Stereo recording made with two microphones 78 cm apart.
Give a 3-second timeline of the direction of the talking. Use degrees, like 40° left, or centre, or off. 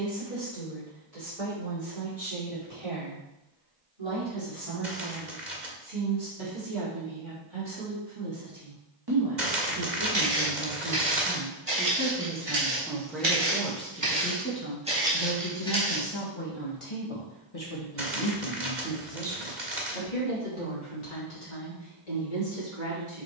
50° right, 40° right, 40° right, 20° right, centre, 40° left, 60° left, 70° left.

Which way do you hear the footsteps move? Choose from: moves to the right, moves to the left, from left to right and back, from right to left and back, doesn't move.
moves to the left.